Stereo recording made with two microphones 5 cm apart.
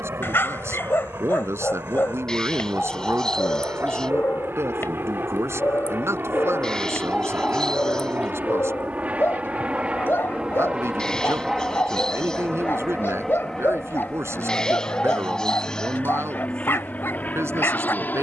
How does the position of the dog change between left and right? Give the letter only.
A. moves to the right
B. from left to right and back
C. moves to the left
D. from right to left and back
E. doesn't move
E.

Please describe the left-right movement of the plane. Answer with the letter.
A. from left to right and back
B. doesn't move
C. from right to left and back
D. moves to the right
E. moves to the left
E.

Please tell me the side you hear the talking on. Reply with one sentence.
In this clip you hear the talking on the right.